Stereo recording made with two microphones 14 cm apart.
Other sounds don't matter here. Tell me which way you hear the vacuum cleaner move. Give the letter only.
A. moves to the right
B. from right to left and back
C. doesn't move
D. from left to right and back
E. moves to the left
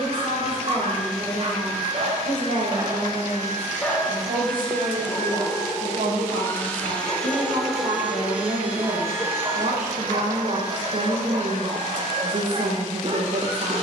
B.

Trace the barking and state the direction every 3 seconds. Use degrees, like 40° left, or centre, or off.
40° right, 20° left, 10° left, 30° right, 40° right.